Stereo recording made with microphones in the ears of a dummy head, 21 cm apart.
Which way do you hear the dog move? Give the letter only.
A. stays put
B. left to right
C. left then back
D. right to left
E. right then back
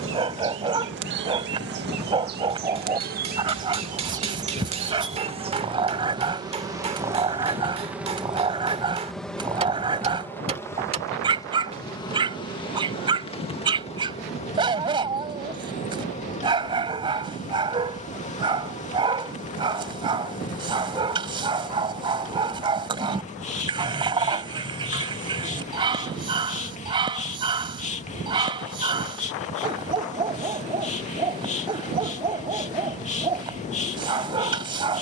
A.